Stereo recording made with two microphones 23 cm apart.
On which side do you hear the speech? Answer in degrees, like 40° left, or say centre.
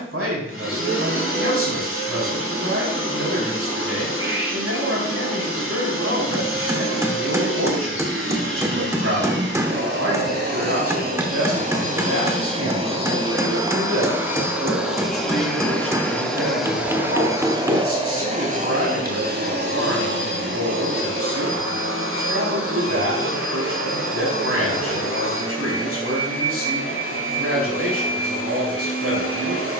80° right.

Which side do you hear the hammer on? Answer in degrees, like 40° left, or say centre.
10° right.